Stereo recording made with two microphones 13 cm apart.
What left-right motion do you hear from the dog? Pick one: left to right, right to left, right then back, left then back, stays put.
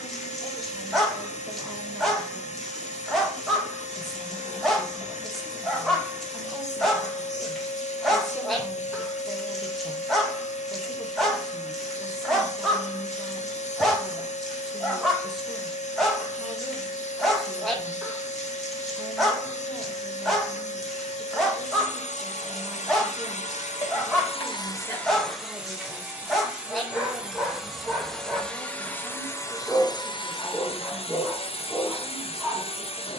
stays put.